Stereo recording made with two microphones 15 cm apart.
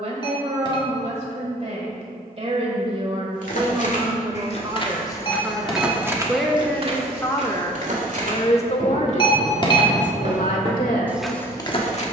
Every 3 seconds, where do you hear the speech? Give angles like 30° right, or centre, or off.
50° right, 30° right, 20° left, 60° left.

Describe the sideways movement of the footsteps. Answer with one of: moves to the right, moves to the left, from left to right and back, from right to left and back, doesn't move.
from left to right and back.